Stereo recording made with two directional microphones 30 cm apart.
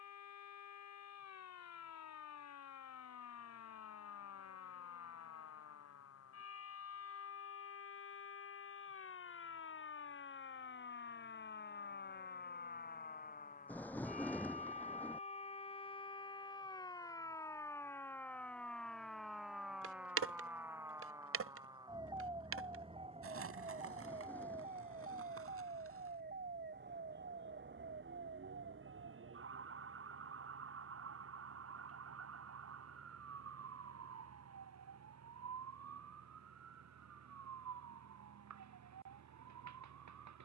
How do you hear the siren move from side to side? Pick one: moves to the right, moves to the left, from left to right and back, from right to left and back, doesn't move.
moves to the right.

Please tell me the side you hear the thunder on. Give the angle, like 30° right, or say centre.
10° left.